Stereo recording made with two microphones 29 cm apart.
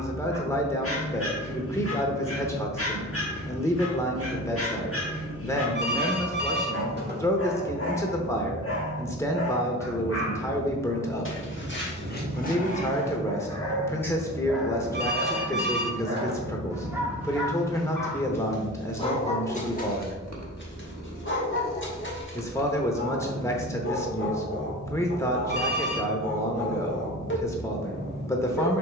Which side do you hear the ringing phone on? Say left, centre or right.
right.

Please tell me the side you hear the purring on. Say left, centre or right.
right.